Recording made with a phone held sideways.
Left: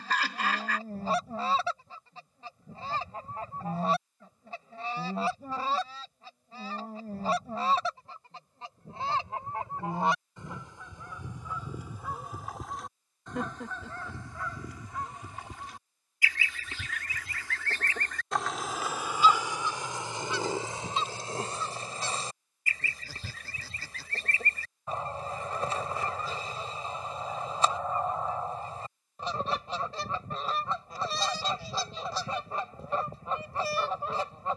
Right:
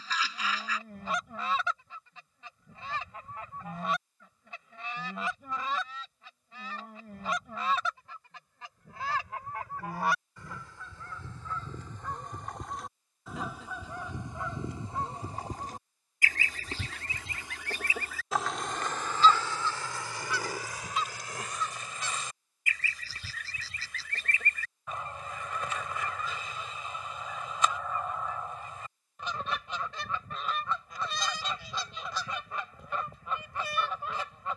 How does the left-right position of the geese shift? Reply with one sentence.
You can hear the geese go right and come back.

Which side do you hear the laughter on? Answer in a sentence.
You can hear the laughter on the left.